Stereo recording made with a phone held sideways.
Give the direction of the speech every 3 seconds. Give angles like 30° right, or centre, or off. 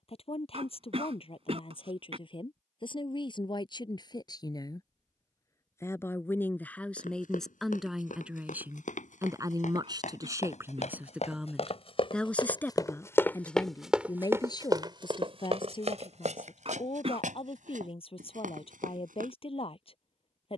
40° left, 30° left, centre, 20° right, 20° left, 40° left, 40° left.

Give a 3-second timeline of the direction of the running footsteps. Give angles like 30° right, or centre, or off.
off, off, 70° left, 60° left, 10° left, 50° right, 70° right.